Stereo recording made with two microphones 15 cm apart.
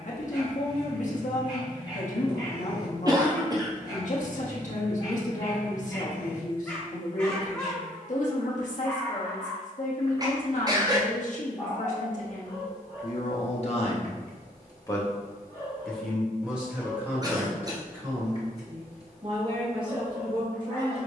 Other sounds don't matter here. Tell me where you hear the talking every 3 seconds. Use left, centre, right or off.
left, left, left, left, left, centre, right.